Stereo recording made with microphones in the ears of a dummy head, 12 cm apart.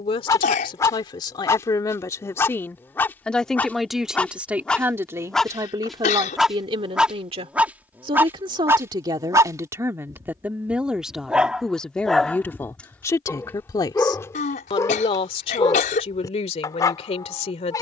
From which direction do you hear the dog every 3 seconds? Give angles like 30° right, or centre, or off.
20° left, 10° left, 10° right, 20° right, 10° left, 30° left.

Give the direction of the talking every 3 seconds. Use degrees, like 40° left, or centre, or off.
30° left, 10° right, 40° right, 10° right, 20° left, 50° left.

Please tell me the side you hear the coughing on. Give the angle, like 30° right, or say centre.
60° left.